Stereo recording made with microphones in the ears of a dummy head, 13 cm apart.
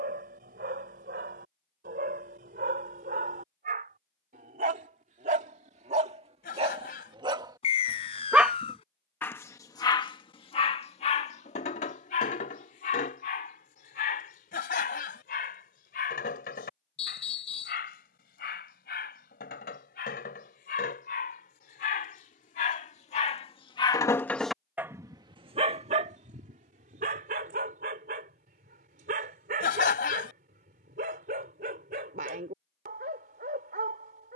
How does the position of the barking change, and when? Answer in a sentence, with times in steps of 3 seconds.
In this clip you hear the barking on the right from 0 s, on the left from 9 s and on the right from 24 s.